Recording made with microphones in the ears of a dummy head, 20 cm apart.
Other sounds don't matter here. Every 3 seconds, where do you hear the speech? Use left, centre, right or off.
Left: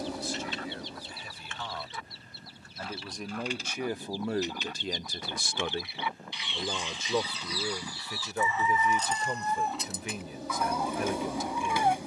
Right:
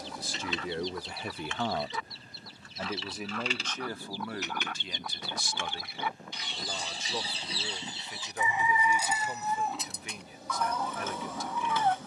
right, left, left, left.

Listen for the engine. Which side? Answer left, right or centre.
left.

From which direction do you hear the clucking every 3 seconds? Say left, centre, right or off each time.
right, right, right, centre.